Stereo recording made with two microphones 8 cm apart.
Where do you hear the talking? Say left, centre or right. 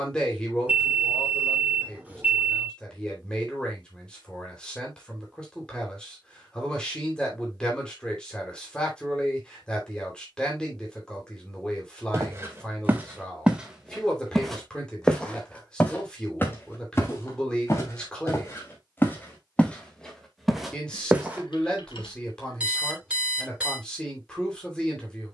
centre.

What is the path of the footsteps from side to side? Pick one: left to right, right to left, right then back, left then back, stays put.
left then back.